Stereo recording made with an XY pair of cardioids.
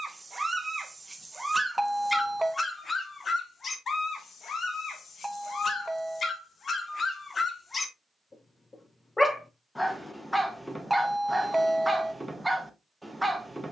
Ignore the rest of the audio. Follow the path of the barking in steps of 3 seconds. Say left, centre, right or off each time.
centre, left, left, centre, centre.